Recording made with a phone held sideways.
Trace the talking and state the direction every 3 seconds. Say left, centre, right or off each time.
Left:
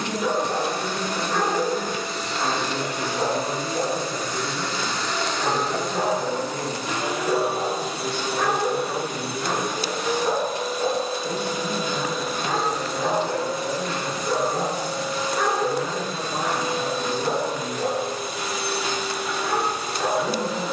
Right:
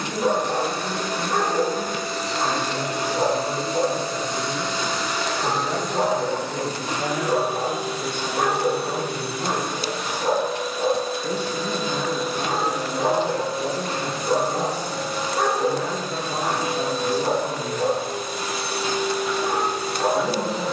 left, centre, right, right, right, right, right.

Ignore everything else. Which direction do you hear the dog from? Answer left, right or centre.
right.